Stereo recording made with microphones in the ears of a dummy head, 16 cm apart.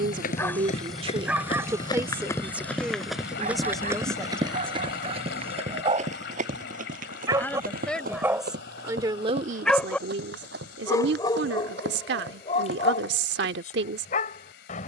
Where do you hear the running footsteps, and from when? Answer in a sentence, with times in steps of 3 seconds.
You can hear the running footsteps on the left from 0 s and on the right from 3 s.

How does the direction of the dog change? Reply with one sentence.
You can hear the dog move from left to right and back again.